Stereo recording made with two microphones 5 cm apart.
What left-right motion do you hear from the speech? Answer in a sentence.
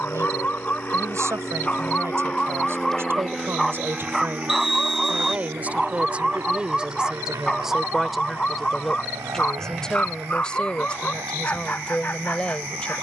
You can hear the speech move to the left.